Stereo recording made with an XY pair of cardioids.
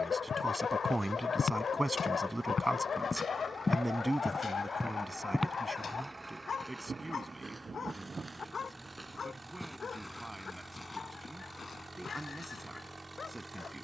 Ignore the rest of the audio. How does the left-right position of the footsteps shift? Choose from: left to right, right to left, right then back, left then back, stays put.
right then back.